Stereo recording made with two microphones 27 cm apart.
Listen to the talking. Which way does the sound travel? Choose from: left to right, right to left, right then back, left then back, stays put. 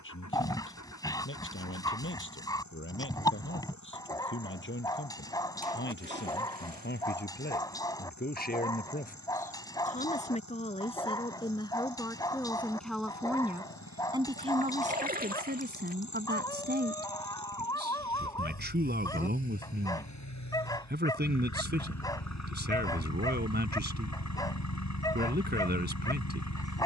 left to right.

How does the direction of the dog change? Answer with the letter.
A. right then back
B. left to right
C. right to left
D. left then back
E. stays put
E.